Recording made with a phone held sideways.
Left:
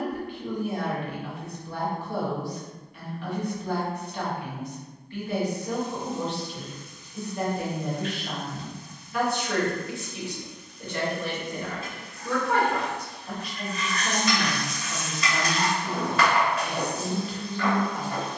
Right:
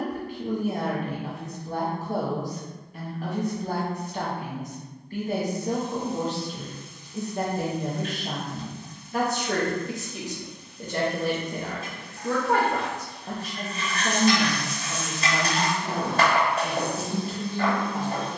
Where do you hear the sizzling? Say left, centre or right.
right.